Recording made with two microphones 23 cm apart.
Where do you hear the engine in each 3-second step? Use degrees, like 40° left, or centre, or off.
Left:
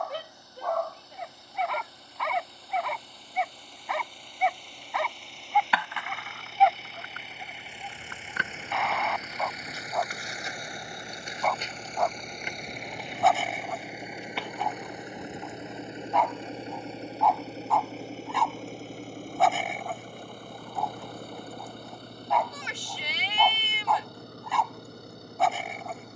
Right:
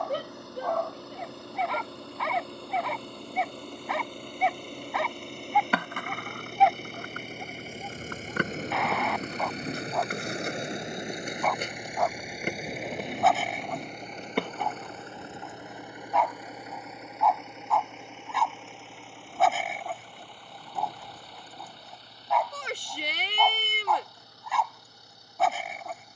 70° right, 60° right, 50° right, 20° right, centre, 30° left, 40° left, 50° left, 60° left.